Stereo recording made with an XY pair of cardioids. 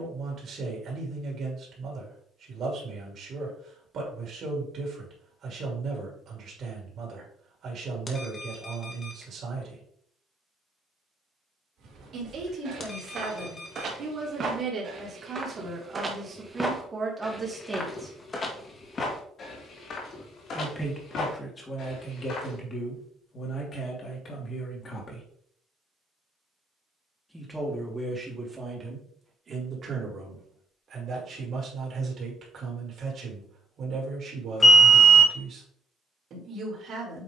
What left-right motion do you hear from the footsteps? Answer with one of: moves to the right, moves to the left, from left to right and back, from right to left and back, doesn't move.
moves to the left.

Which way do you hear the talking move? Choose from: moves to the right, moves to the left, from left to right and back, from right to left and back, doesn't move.
from right to left and back.